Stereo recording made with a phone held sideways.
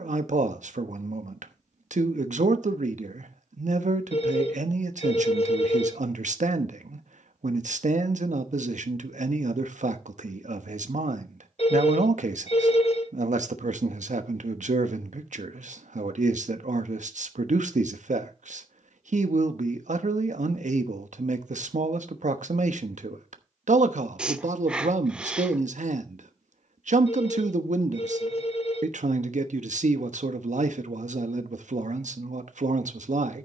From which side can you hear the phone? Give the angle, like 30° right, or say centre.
50° left.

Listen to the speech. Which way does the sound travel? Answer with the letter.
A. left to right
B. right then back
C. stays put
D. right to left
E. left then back
C.